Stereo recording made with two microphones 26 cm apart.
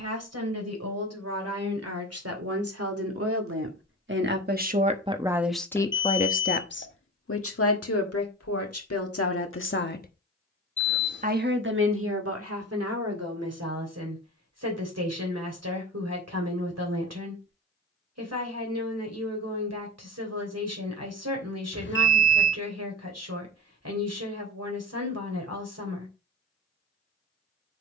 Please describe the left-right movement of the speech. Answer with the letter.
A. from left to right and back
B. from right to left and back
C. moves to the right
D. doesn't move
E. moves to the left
B.